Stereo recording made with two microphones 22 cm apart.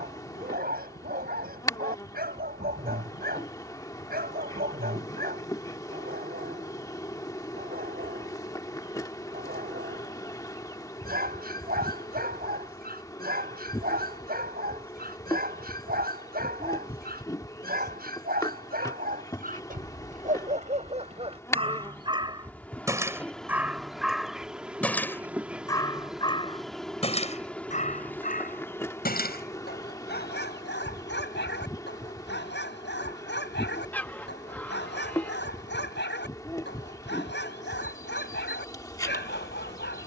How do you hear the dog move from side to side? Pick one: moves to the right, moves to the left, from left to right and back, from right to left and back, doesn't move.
moves to the left.